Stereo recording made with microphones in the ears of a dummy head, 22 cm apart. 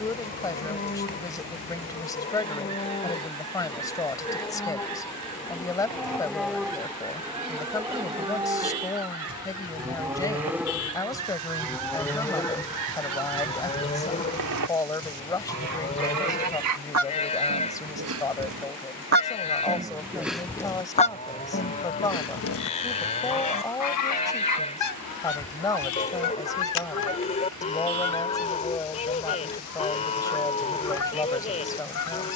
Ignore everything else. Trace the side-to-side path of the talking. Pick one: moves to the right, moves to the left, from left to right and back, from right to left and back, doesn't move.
doesn't move.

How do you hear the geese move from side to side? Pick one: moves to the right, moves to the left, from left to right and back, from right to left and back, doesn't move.
moves to the left.